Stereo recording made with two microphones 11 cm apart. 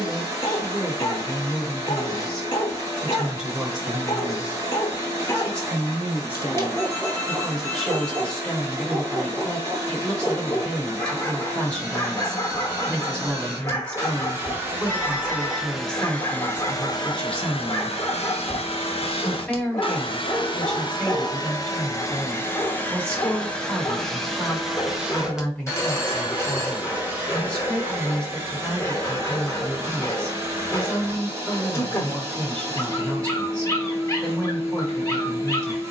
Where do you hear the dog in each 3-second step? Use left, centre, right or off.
left, left, centre, centre, left, left, left, left, left, left, left, left.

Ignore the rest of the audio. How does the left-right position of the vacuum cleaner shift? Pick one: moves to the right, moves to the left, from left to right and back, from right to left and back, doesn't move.
from right to left and back.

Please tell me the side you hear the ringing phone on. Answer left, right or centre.
left.